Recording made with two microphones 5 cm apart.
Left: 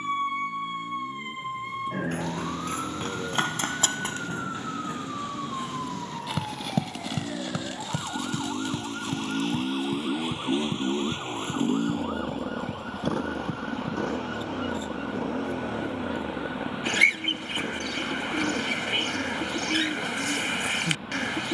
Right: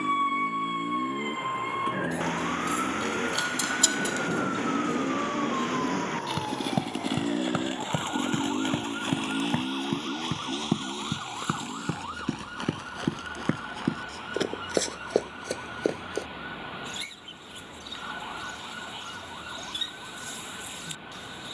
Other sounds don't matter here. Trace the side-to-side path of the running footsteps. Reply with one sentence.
You can hear the running footsteps travel towards the right.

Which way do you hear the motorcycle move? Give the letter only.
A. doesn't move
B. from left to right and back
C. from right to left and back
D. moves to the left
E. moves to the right
D.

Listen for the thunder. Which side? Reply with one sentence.
In this clip you hear the thunder on the right.